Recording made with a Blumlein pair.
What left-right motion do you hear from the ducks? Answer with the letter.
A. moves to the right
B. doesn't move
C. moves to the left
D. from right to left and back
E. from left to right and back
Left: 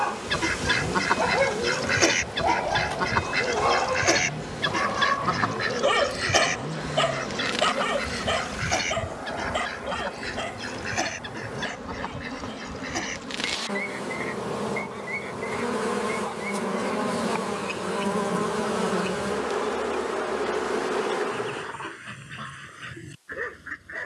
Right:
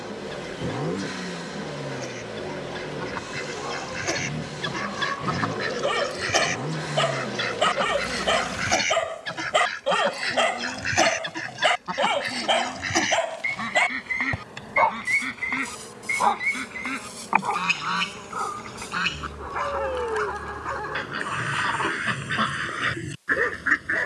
A.